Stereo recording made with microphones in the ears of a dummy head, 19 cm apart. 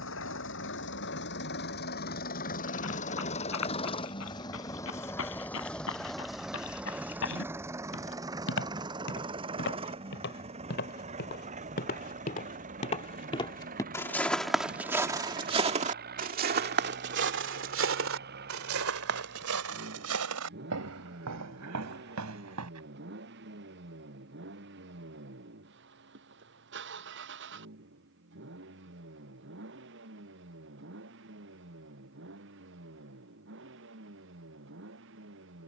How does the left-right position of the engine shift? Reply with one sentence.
In this clip you hear the engine move from left to right.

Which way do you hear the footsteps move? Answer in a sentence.
You can hear the footsteps go from the left side to the right.